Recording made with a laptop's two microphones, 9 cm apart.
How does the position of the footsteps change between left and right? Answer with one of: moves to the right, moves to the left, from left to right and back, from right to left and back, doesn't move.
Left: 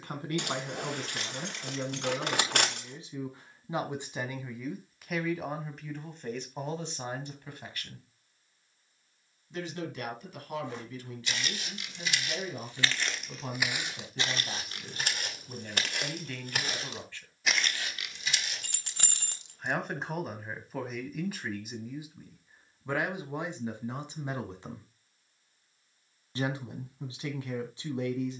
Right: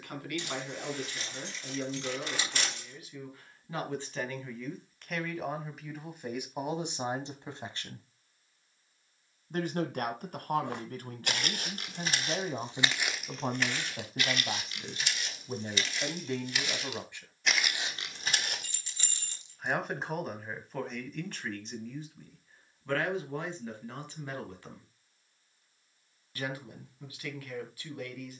from right to left and back.